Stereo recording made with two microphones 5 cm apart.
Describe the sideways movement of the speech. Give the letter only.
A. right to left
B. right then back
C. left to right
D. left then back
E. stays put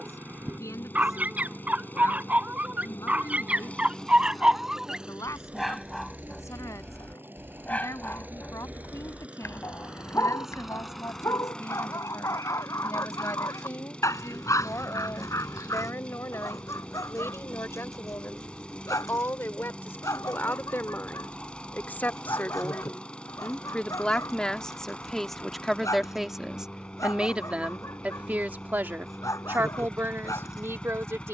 C.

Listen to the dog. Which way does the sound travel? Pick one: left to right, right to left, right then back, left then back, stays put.
right to left.